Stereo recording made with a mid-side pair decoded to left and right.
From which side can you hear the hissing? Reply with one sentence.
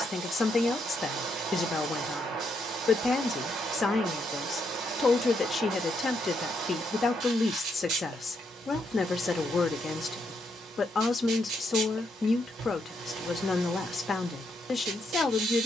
You can hear the hissing on the right.